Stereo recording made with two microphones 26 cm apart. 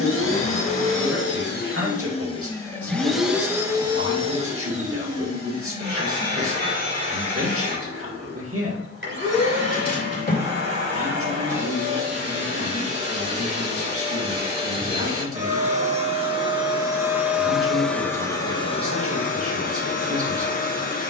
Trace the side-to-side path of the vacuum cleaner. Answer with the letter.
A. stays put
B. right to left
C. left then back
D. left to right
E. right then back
E.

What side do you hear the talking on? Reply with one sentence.
You can hear the talking on the right.